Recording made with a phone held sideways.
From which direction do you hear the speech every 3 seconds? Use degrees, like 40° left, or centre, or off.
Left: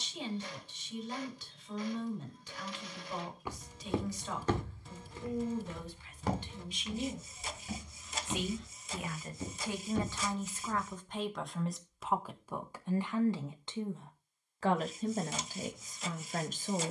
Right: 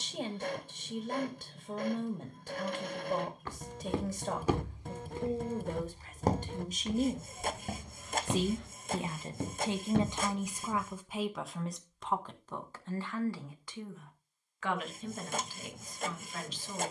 50° right, 50° right, 40° right, 10° right, 20° left, 40° left.